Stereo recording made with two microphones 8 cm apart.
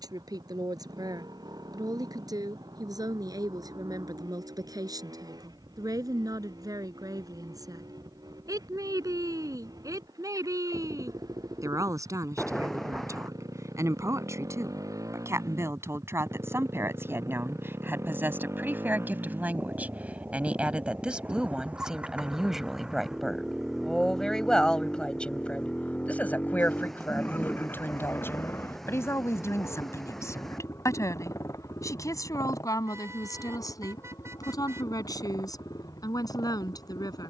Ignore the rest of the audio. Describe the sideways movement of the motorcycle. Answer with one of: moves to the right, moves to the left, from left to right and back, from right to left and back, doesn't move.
moves to the left.